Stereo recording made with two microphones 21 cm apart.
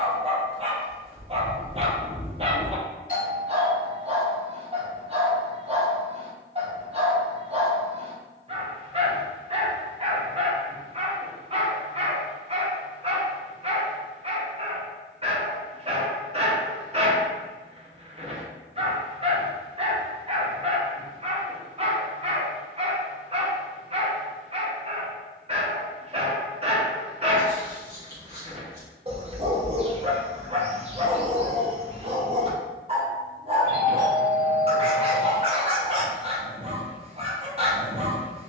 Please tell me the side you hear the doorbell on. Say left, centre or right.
left.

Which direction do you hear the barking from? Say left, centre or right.
right.